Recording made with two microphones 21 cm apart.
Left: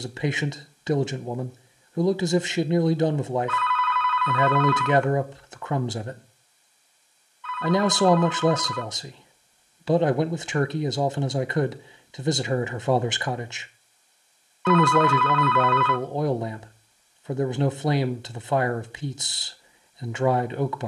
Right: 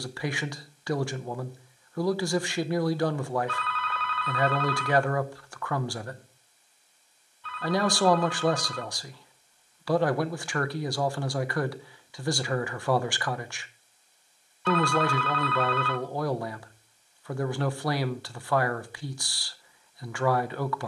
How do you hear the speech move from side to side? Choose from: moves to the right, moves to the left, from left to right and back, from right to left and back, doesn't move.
doesn't move.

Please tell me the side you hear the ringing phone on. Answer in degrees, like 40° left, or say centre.
40° right.